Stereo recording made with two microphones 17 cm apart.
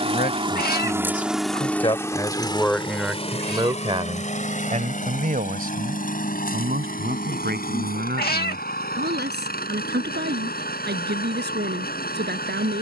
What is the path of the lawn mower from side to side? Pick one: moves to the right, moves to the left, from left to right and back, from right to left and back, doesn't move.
moves to the left.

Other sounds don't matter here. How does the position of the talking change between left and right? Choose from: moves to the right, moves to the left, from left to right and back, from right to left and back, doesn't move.
moves to the right.